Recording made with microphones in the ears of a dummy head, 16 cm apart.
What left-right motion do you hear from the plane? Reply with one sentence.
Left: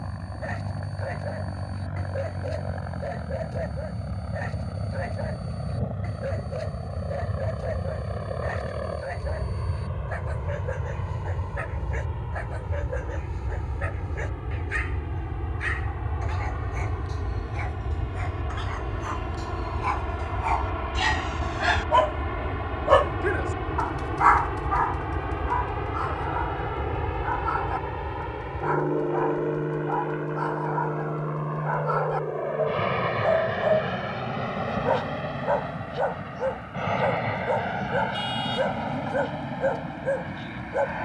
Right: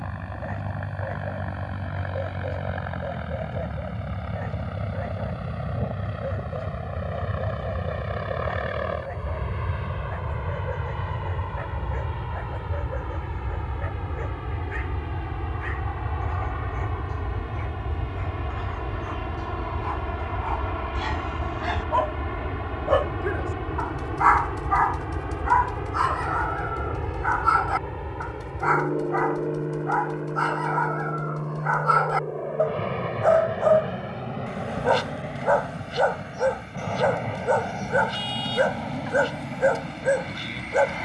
In this clip you hear the plane move from right to left.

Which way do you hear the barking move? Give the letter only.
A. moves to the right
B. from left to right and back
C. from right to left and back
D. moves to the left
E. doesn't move
A.